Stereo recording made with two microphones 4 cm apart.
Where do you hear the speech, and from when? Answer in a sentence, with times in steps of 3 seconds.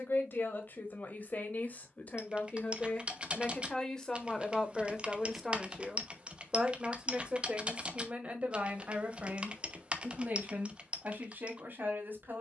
You can hear the speech on the left from 0 s, in the centre from 3 s and on the right from 6 s.